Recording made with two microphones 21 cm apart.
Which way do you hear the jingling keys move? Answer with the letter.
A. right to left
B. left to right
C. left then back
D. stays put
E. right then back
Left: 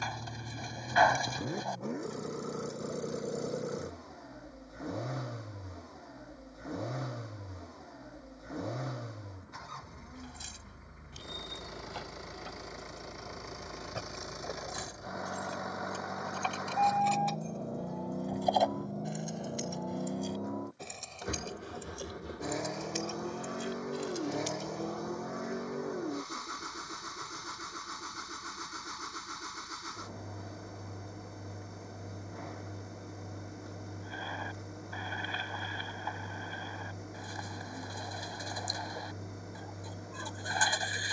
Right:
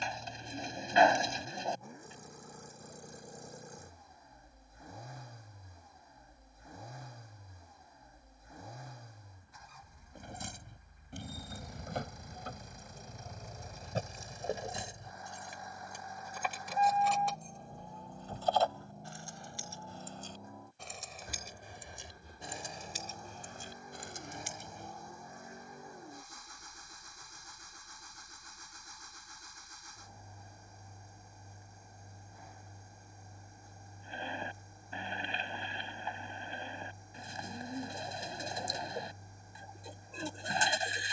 C.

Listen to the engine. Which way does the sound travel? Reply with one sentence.
In this clip you hear the engine stay in one place.